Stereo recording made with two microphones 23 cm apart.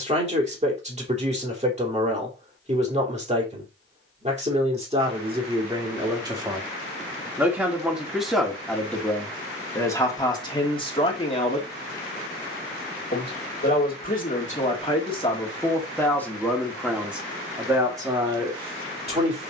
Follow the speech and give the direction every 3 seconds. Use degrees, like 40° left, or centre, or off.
30° right, 30° right, 10° right, 20° left, 30° left, centre, 20° right.